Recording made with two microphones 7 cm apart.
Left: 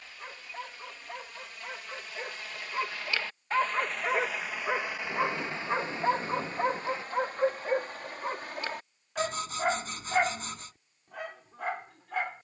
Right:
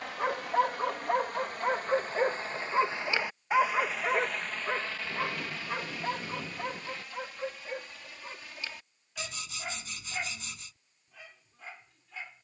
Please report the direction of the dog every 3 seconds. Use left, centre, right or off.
right, centre, left, left.